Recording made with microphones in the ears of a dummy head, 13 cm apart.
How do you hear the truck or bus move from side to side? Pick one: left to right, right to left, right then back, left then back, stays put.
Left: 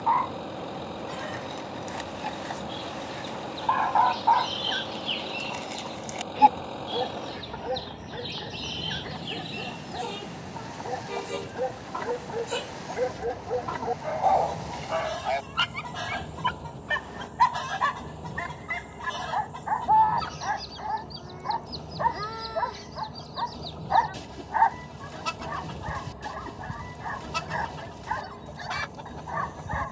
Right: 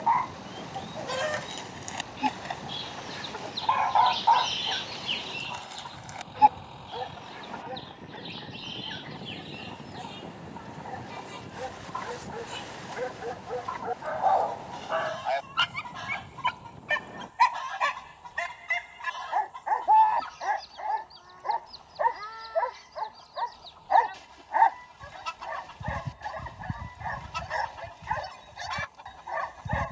stays put.